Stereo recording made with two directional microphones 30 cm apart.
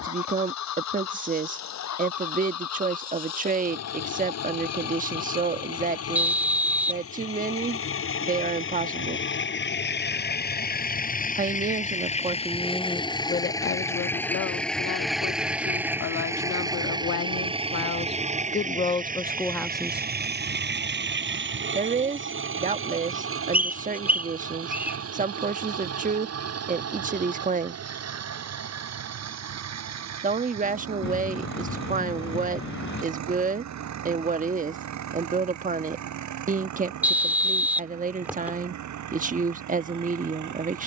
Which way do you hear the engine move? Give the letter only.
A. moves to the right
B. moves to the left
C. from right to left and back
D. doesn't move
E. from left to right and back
A.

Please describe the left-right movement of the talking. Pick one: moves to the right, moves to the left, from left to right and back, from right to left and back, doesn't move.
from right to left and back.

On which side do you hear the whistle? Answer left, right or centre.
centre.